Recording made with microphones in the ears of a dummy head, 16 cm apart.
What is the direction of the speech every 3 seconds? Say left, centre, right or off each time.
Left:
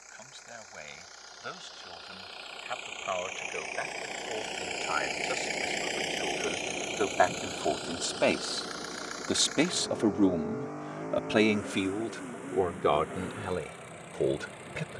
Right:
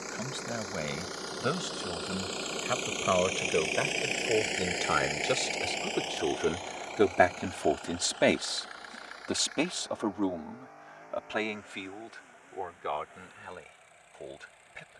right, right, right, left, left.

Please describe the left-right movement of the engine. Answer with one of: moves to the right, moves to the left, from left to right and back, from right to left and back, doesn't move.
moves to the left.